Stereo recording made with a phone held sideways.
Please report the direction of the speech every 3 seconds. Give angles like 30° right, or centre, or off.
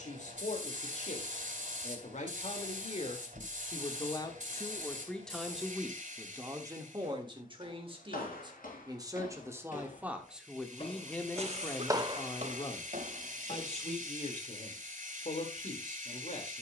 50° left, 20° left, 30° right, centre, 40° left, 50° left.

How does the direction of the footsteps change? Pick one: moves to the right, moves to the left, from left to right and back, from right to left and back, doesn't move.
moves to the right.